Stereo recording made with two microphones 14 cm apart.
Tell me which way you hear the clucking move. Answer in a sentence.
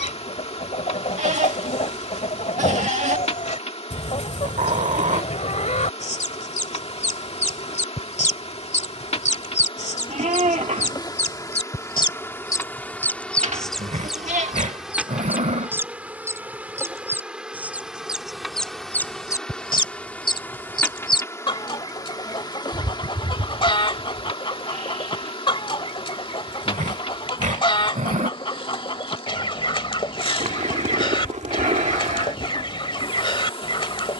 In this clip you hear the clucking go right and come back.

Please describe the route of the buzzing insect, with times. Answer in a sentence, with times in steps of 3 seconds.
In this clip you hear the buzzing insect on the left from 0 s, in the centre from 12 s and on the left from 21 s.